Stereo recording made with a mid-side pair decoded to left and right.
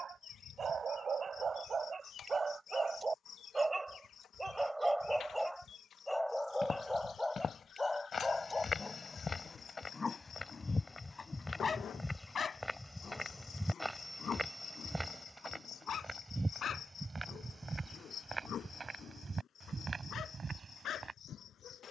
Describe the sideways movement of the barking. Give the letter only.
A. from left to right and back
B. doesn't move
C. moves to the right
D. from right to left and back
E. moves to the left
E.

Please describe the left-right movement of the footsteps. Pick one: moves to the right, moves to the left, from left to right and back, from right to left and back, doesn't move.
moves to the right.